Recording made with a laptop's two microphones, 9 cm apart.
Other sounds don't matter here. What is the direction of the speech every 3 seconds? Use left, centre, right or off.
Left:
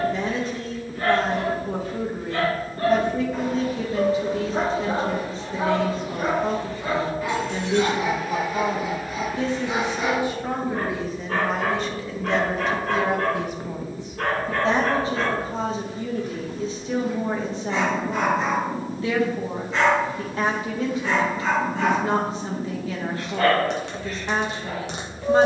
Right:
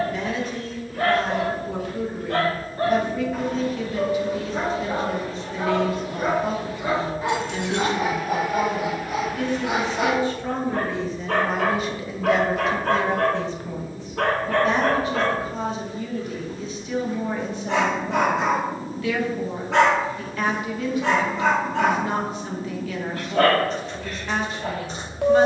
left, left, left, centre, centre, left, left, left, left.